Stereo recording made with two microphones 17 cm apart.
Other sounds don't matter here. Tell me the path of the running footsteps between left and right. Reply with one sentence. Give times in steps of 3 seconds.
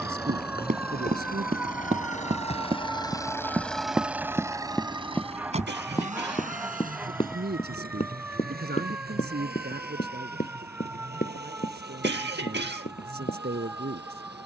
You can hear the running footsteps on the right from 0 s, in the centre from 3 s and on the left from 6 s.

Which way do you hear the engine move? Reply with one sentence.
In this clip you hear the engine move to the right.